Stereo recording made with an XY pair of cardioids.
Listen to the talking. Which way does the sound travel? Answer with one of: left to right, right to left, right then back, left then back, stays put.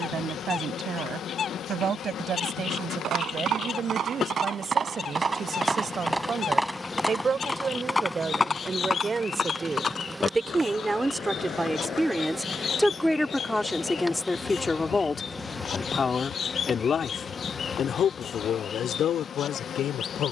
right to left.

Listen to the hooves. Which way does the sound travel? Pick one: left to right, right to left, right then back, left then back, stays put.
right to left.